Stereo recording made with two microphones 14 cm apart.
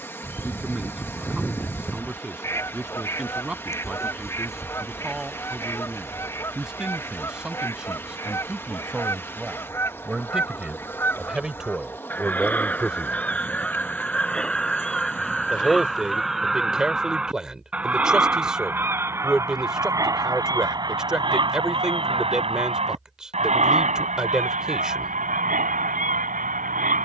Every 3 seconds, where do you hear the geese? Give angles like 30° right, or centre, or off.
20° left, 20° left, 20° left, 20° left, 10° left, centre, 20° right, 40° right, 70° right.